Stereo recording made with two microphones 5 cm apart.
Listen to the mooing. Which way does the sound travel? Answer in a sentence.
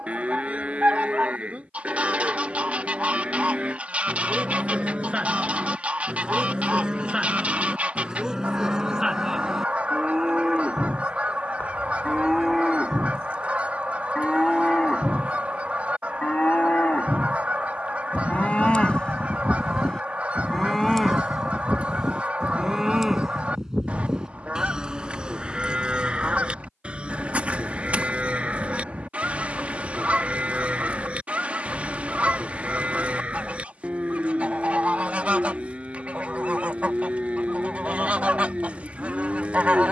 You can hear the mooing move from right to left and back again.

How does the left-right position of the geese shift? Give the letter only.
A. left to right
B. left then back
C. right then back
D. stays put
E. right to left
D.